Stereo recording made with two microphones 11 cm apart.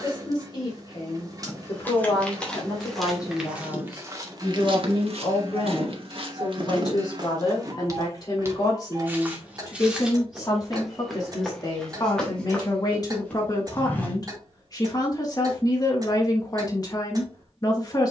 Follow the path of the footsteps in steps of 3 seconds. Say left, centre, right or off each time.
centre, right, right, centre, centre, off.